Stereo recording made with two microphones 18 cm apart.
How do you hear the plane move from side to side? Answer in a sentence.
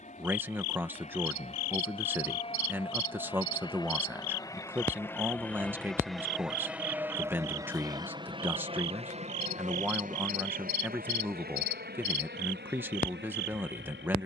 In this clip you hear the plane move from left to right.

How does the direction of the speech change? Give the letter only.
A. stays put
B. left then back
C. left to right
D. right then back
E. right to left
A.